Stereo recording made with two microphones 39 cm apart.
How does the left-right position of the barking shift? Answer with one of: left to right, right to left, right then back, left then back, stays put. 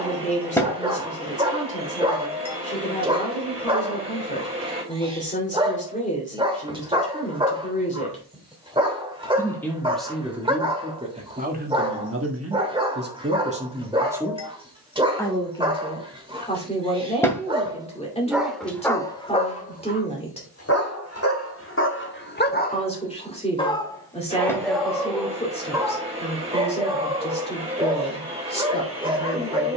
left then back.